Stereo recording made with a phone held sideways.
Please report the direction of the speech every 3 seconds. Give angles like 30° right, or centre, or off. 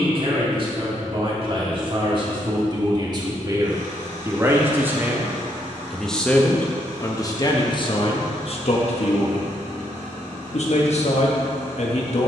40° right, 20° right, 30° left, 60° left.